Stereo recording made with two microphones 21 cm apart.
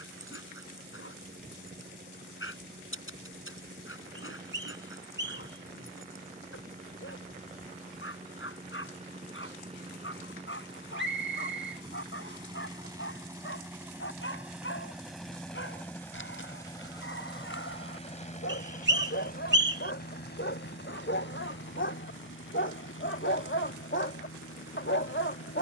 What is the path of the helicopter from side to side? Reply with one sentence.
In this clip you hear the helicopter travel towards the left.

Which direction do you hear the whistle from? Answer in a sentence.
You can hear the whistle on the right.